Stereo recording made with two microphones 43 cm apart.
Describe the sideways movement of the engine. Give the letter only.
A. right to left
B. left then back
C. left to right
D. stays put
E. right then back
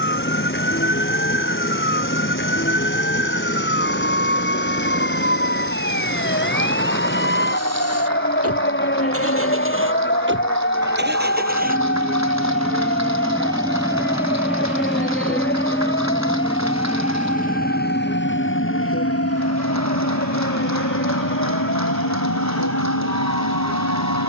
A.